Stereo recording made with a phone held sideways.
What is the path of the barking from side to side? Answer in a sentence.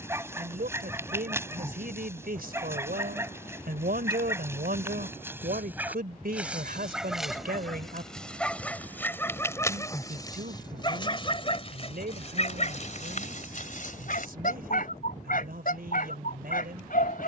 In this clip you hear the barking go from the right side to the left.